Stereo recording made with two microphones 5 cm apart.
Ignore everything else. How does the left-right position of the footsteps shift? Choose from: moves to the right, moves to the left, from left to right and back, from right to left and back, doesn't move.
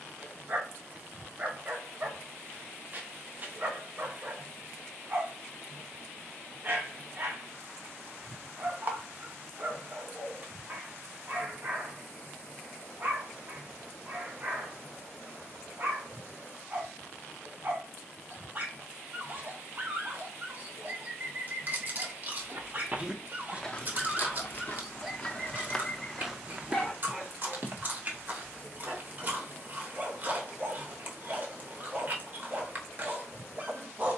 from right to left and back.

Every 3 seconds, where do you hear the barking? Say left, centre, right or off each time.
right, right, right, right, right, right, right, right, centre, right, right, right.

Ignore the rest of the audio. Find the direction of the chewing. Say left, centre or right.
right.